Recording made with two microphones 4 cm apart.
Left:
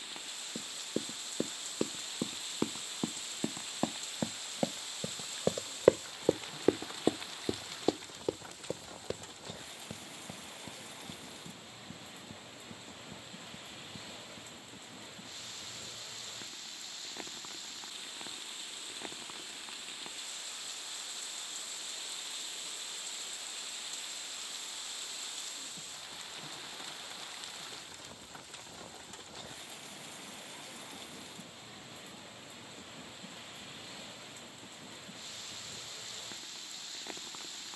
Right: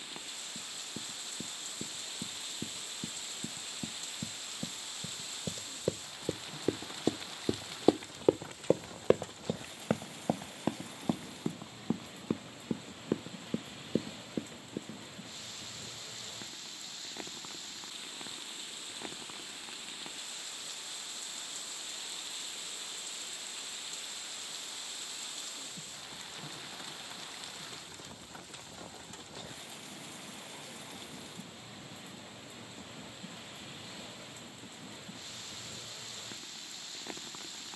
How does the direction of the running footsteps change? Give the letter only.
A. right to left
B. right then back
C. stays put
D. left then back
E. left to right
E.